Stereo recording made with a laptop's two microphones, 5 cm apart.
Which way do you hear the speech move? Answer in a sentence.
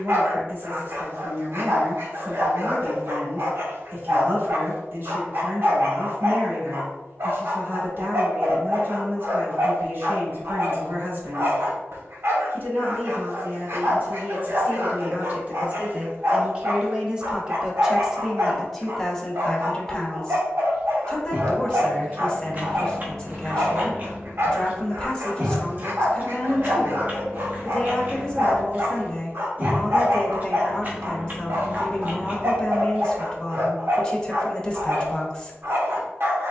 In this clip you hear the speech go from the right side to the left.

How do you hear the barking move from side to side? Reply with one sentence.
You can hear the barking stay in one place.